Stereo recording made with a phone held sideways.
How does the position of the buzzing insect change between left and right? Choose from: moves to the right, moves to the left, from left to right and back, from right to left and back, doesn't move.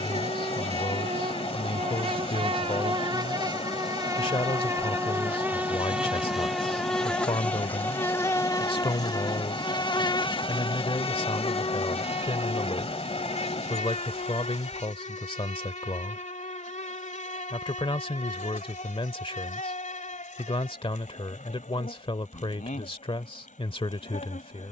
moves to the left.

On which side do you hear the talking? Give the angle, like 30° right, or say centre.
40° left.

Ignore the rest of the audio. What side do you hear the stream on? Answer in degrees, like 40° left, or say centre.
50° left.